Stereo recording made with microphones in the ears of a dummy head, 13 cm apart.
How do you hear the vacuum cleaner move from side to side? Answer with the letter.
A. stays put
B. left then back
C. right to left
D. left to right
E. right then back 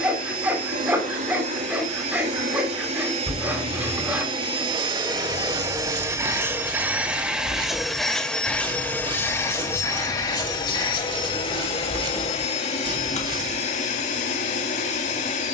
C.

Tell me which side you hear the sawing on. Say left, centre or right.
centre.